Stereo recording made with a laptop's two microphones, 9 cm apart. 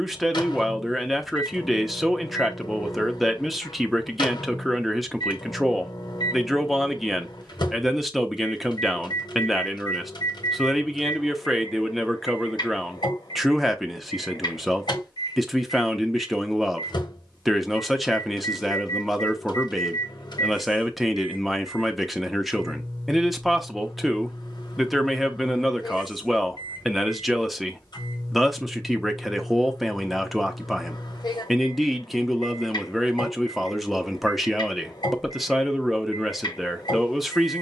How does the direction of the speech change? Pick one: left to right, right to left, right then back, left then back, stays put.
stays put.